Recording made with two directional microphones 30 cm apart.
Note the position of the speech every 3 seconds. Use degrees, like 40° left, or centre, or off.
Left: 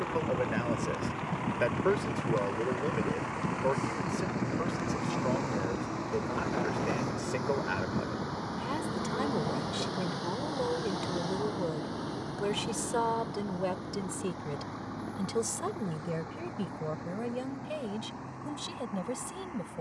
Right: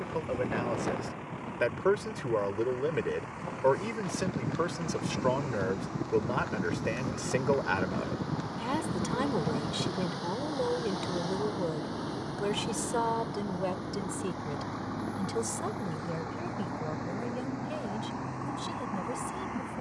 10° right, 40° right, 30° right, 10° right, centre, 20° left, 20° left.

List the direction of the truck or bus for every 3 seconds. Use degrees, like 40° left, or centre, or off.
50° left, 40° left, 30° left, 10° left, 20° right, 30° right, 50° right.